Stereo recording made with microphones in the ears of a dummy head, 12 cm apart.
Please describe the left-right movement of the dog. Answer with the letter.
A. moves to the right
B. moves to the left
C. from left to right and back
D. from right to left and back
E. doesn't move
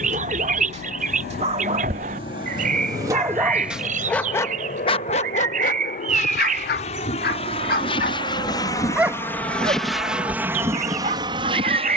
D.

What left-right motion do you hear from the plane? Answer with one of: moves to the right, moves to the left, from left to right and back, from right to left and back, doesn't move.
moves to the right.